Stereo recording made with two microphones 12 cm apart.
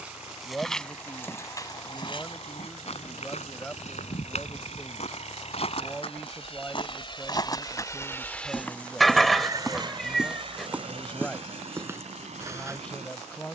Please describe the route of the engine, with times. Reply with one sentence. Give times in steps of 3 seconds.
In this clip you hear the engine on the left from 0 s and on the right from 9 s.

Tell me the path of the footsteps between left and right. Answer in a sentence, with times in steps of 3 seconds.
In this clip you hear the footsteps on the left from 0 s, in the centre from 9 s and on the right from 12 s.